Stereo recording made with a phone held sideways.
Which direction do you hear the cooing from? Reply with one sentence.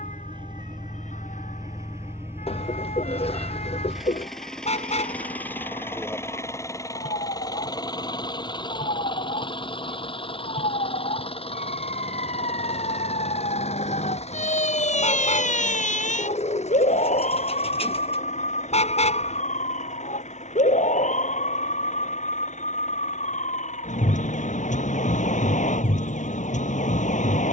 In this clip you hear the cooing on the left.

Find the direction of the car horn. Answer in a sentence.
You can hear the car horn on the left.